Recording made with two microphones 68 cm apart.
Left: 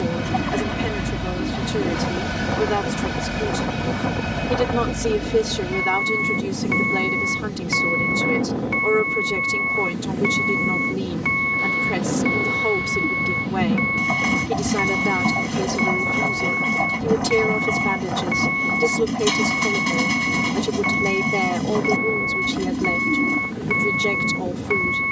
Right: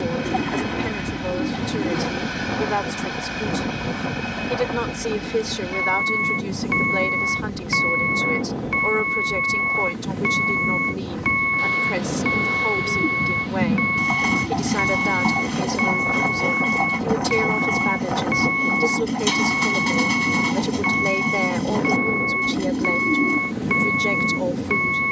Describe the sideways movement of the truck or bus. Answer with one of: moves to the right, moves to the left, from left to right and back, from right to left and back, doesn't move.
doesn't move.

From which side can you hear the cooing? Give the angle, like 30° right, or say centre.
10° left.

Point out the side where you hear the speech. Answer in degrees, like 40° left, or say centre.
60° left.